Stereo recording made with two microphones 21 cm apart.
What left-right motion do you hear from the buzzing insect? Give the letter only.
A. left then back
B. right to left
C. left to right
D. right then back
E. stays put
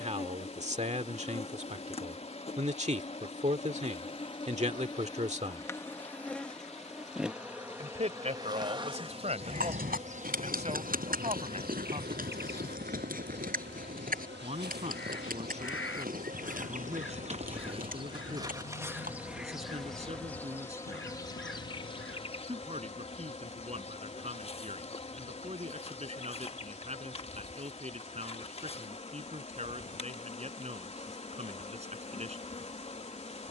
D.